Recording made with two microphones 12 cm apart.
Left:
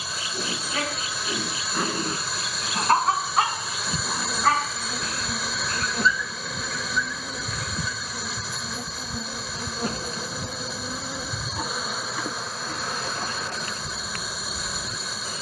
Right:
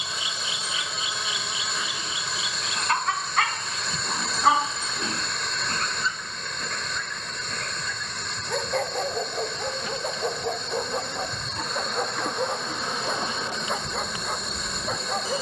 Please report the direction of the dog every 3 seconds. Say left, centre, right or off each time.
left, centre, right, right, right.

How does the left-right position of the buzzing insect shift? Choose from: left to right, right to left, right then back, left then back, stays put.
left then back.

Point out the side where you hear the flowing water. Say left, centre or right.
centre.